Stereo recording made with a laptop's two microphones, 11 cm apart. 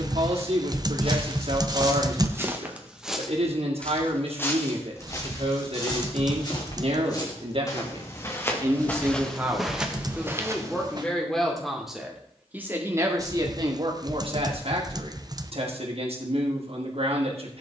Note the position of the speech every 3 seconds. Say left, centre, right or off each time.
right, right, right, centre, right, right.